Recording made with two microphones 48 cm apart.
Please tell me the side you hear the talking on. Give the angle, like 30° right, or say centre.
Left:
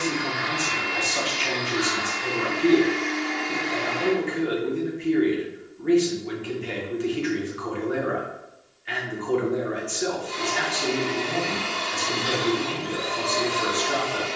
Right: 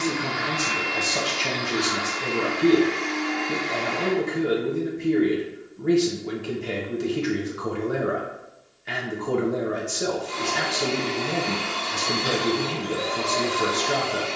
60° right.